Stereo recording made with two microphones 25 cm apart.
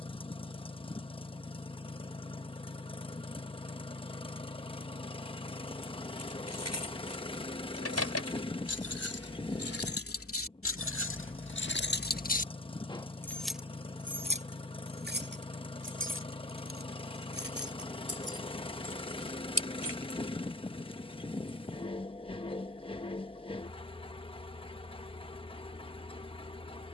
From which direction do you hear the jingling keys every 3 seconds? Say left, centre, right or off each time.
off, off, left, left, centre, right, right, off, off.